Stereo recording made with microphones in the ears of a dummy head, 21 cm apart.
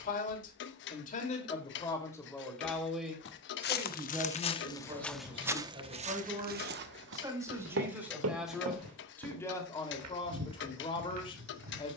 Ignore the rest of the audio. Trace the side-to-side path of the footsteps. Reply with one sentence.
You can hear the footsteps move to the right.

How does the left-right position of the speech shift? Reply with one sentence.
In this clip you hear the speech go right and come back.